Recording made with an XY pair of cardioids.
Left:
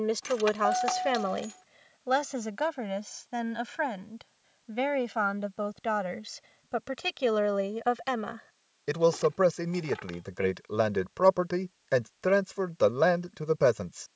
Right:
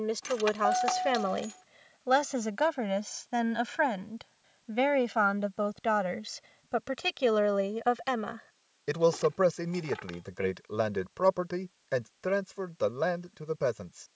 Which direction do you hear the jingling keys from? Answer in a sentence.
You can hear the jingling keys in the centre.